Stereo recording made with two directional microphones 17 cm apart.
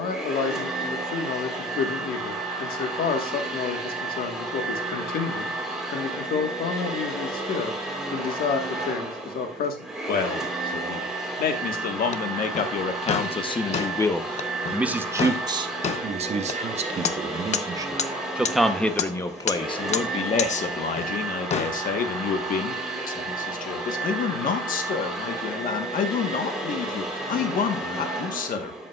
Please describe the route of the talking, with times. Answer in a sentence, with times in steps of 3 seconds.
You can hear the talking on the left from 0 s, on the right from 15 s and on the left from 18 s.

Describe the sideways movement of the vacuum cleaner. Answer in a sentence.
In this clip you hear the vacuum cleaner stay in one place.